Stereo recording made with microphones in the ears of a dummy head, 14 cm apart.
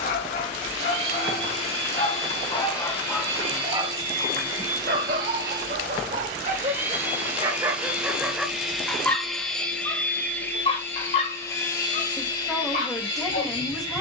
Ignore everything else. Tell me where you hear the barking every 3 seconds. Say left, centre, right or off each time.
left, right, right, left, left.